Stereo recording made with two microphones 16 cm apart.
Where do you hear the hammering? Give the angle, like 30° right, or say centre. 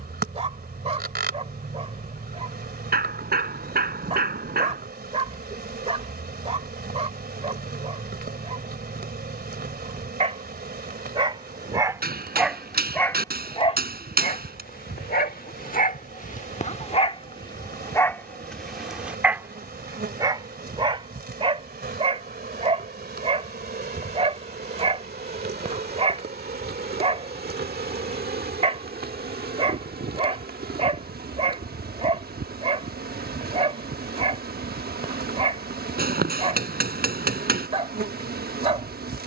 70° right.